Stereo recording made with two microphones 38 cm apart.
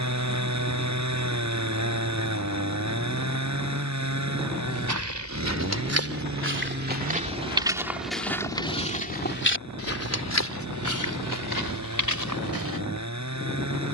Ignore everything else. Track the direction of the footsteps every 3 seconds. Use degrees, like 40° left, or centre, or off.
off, 50° right, 10° right, 40° left, 60° left.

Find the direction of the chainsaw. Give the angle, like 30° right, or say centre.
40° right.